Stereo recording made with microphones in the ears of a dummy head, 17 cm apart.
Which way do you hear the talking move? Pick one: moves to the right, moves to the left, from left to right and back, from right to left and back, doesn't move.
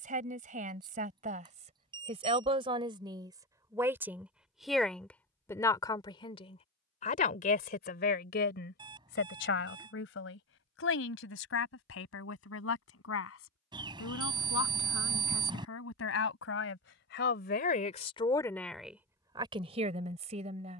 from right to left and back.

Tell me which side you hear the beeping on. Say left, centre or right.
right.